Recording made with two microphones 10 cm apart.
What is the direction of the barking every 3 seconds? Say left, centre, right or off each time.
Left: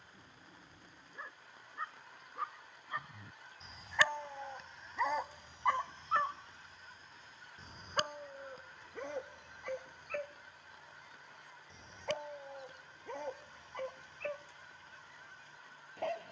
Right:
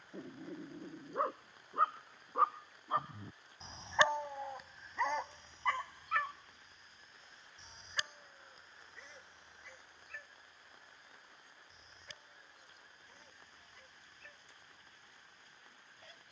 right, centre, left, left, left, left.